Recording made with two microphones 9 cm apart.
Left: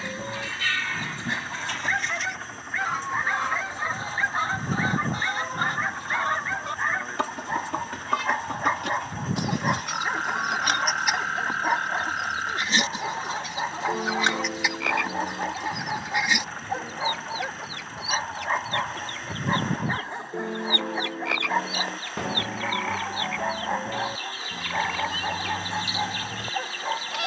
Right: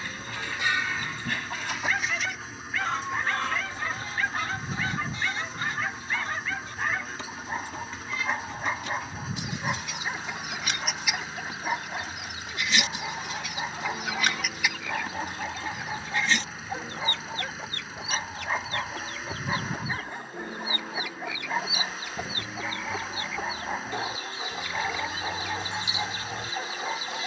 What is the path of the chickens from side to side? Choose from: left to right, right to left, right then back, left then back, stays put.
left then back.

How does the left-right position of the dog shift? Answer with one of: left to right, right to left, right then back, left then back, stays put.
stays put.